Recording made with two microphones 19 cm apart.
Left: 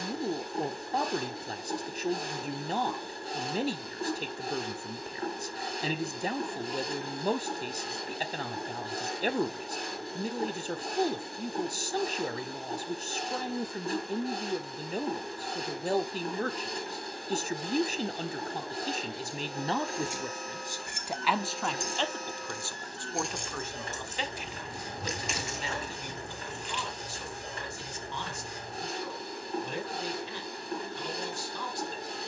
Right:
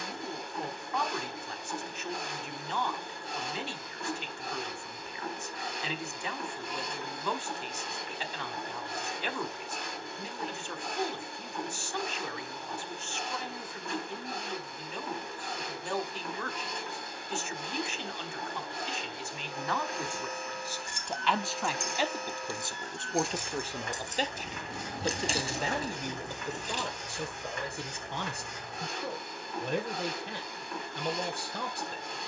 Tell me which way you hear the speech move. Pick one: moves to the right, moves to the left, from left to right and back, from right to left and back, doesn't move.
moves to the right.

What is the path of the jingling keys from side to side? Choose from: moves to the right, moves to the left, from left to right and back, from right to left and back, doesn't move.
moves to the right.